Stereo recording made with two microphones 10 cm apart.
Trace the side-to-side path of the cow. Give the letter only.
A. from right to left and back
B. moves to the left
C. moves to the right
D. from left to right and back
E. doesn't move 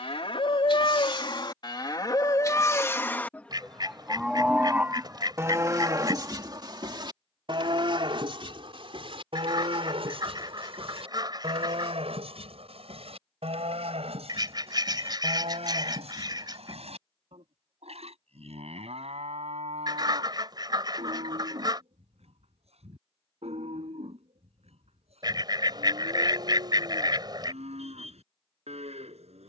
C.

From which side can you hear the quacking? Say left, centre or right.
right.